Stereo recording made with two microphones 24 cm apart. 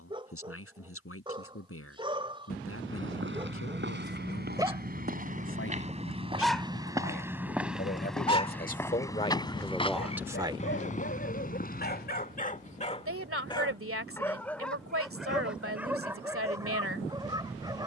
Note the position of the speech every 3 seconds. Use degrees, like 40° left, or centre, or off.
70° left, 70° left, 40° left, centre, 60° right, 60° right.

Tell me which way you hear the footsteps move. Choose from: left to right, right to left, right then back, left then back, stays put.
right to left.